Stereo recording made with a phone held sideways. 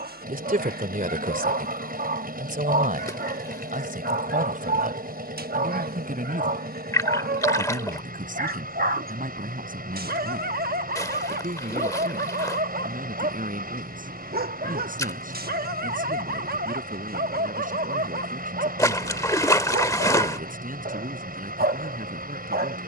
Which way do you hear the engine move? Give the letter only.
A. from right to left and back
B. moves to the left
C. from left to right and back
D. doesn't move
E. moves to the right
D.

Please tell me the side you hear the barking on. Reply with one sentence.
You can hear the barking on the right.